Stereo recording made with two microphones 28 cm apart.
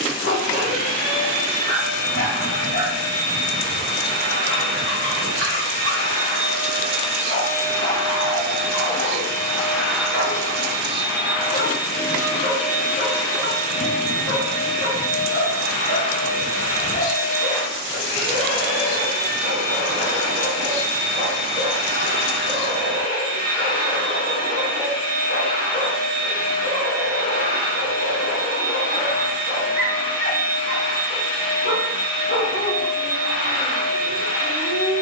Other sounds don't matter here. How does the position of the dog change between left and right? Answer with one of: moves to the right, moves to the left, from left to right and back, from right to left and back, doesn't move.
doesn't move.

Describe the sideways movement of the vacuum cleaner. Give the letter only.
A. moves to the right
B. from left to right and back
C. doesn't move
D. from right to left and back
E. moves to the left
B.